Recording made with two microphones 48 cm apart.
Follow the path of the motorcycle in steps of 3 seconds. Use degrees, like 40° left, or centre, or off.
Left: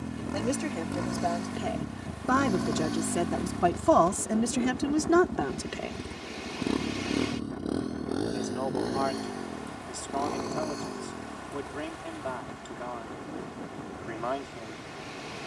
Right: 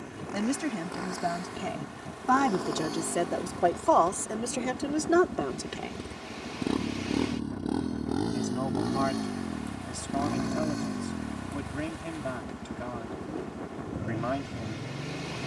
50° left, 20° left, 10° right, 30° right, 50° right.